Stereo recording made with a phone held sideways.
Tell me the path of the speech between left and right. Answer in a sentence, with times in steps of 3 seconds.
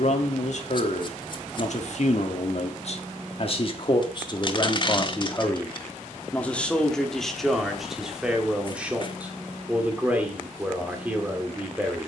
You can hear the speech on the left from 0 s and in the centre from 6 s.